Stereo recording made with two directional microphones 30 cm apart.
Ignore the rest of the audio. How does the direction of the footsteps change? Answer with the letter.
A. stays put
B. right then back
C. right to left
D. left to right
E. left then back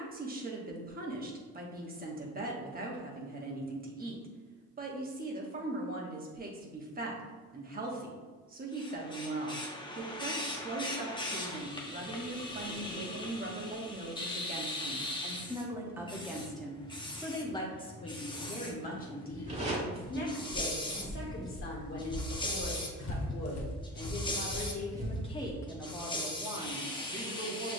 E.